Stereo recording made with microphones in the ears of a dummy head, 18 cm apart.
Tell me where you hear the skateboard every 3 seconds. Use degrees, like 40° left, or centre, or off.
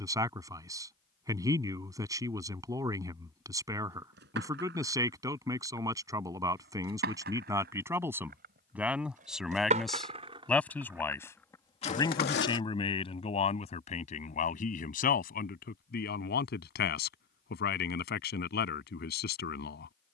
off, 60° right, 50° right, 20° right, 50° left, off, off.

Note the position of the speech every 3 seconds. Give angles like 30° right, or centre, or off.
20° right, 20° right, 10° right, 10° left, 30° left, 50° left, 50° left.